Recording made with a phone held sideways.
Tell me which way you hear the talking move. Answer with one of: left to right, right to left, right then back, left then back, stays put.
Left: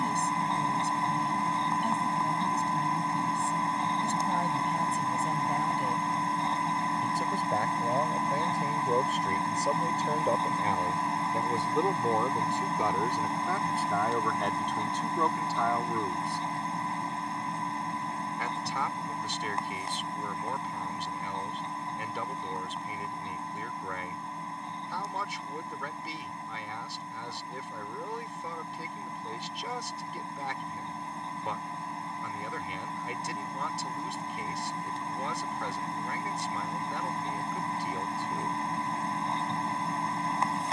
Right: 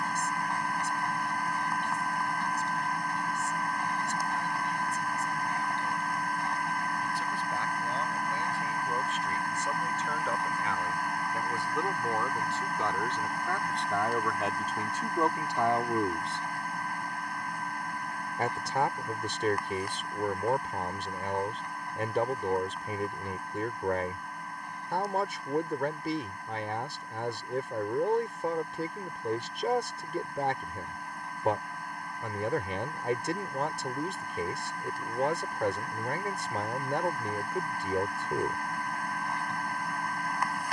left to right.